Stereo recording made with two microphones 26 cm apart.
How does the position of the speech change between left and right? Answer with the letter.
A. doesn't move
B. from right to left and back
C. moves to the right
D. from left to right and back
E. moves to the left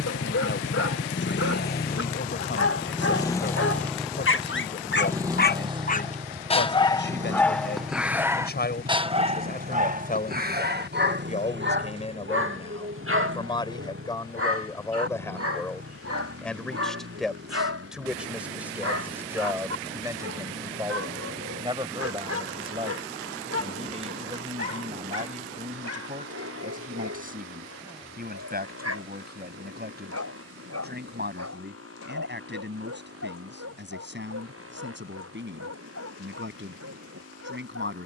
C.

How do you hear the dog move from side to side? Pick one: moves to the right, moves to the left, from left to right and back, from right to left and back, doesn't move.
moves to the right.